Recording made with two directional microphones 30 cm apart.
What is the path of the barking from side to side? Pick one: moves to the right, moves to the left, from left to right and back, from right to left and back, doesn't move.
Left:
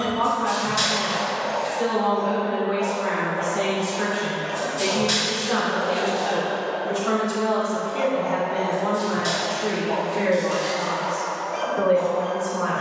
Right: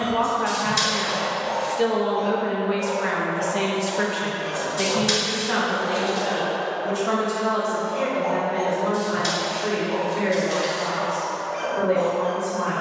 from left to right and back.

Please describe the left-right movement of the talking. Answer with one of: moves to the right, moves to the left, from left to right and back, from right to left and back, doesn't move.
moves to the left.